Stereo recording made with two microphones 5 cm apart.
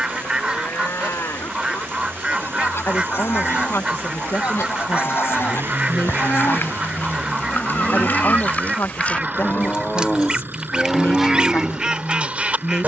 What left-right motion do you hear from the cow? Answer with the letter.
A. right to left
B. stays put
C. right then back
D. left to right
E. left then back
D.